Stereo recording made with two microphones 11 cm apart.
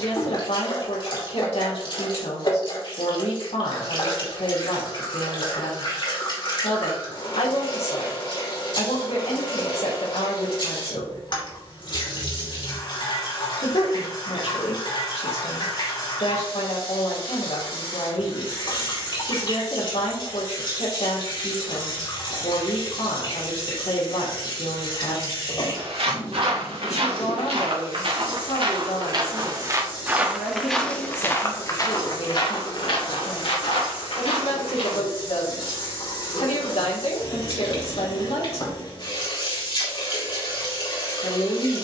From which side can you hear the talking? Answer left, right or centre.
left.